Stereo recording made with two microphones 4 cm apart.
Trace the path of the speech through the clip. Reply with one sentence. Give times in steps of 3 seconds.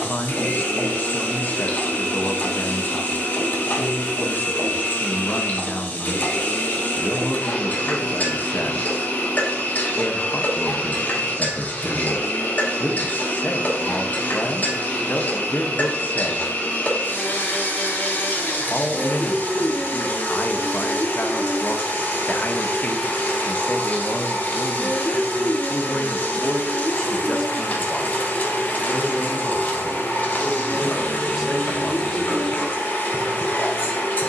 In this clip you hear the speech on the left from 0 s, in the centre from 27 s and not at all from 33 s.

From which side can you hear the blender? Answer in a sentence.
You can hear the blender on the left.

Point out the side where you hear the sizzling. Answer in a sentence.
In this clip you hear the sizzling on the left.